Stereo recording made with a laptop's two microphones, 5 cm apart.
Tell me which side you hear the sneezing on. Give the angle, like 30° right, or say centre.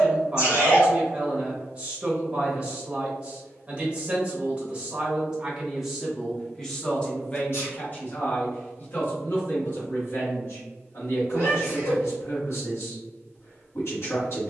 60° left.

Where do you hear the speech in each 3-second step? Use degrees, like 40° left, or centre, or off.
20° right, 20° right, 30° left, 60° left, 60° left.